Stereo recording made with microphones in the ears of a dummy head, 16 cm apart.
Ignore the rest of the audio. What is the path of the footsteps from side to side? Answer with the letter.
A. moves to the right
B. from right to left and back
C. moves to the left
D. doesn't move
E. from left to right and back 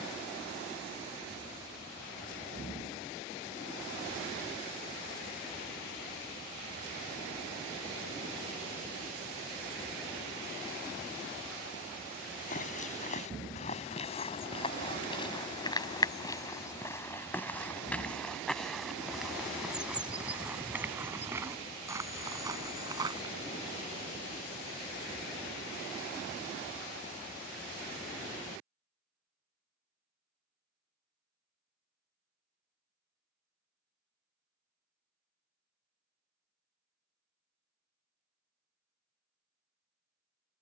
A.